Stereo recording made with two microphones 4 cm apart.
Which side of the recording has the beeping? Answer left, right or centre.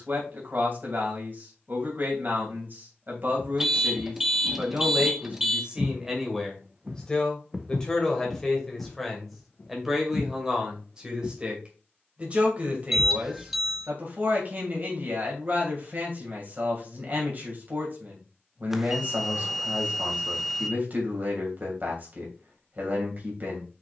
centre.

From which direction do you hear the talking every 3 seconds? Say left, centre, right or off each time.
right, right, centre, centre, right, right, right, right.